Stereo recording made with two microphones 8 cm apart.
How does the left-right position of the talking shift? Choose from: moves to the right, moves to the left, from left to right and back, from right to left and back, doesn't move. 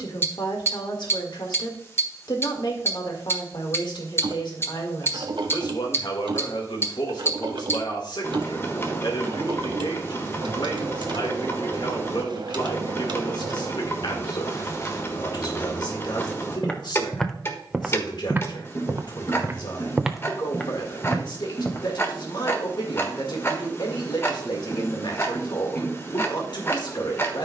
doesn't move.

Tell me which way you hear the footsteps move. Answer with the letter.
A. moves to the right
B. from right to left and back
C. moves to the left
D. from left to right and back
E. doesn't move
D.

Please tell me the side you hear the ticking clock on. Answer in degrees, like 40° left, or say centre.
30° left.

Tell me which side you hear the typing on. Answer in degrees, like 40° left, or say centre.
70° right.